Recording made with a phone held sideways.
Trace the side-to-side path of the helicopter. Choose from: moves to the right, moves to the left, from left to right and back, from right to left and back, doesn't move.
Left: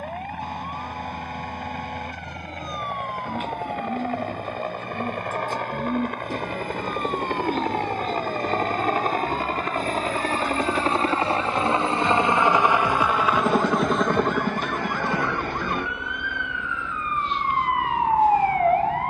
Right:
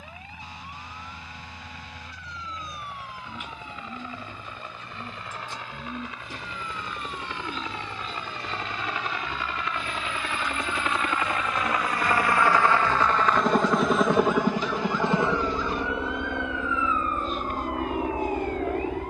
moves to the right.